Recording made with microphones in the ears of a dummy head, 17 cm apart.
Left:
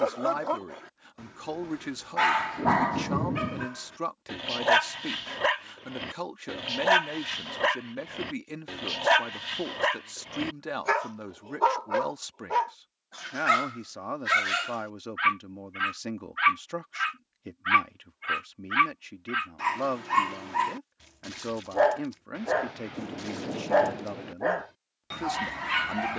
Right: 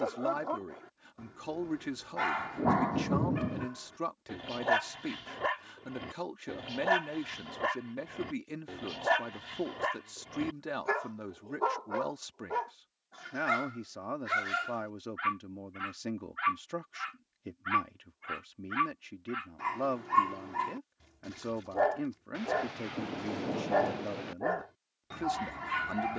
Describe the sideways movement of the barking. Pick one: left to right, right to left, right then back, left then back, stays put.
stays put.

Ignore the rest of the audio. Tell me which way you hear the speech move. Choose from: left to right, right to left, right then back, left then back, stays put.
stays put.